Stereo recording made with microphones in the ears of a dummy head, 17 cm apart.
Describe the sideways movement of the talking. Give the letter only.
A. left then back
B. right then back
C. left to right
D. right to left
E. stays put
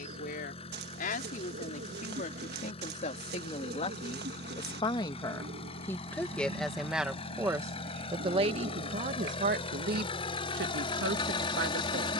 C.